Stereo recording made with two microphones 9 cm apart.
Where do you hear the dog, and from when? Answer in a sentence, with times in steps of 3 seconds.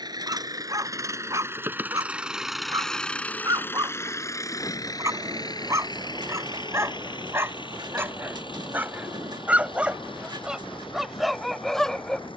You can hear the dog on the right from 0 s and in the centre from 9 s.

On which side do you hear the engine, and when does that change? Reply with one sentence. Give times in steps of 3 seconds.
In this clip you hear the engine on the right from 0 s and on the left from 3 s.